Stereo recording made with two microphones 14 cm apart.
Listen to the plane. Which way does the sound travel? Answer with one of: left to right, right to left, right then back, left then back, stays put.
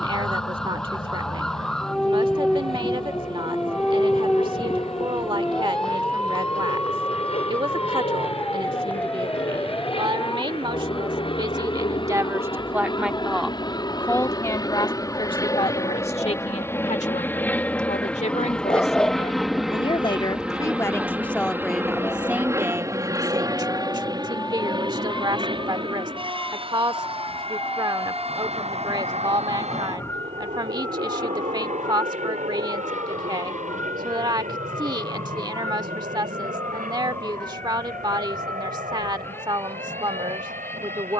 left to right.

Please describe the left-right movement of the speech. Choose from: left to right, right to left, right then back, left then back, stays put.
left then back.